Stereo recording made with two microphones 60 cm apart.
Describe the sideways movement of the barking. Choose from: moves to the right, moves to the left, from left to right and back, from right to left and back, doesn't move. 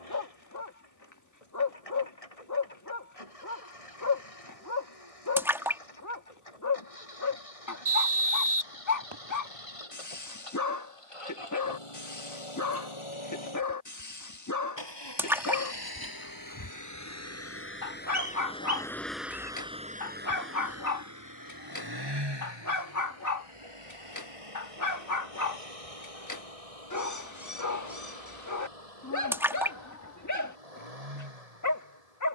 doesn't move.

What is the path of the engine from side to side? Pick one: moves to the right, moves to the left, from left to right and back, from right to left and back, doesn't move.
moves to the right.